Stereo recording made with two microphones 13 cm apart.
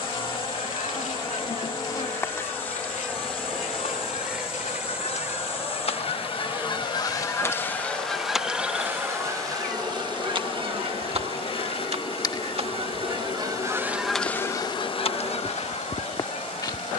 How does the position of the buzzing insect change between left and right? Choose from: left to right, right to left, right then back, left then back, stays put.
right then back.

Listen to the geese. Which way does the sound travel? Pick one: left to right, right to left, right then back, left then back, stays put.
right then back.